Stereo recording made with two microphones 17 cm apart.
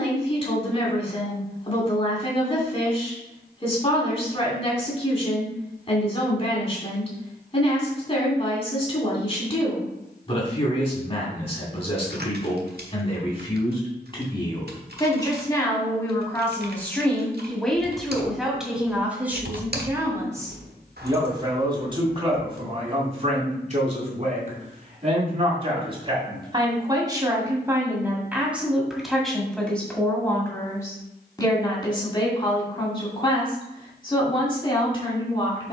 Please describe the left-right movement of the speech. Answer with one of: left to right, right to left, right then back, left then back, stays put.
right then back.